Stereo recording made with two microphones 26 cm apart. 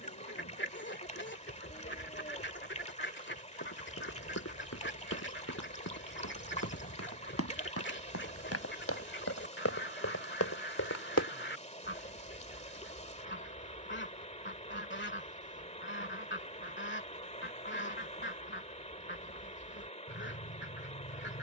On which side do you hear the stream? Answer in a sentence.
In this clip you hear the stream on the left.